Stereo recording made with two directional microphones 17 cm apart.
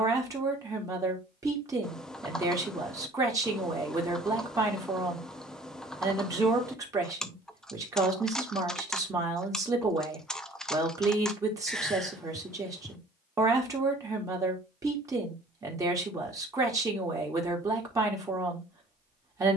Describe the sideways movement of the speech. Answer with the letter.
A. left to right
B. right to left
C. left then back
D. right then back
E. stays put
E.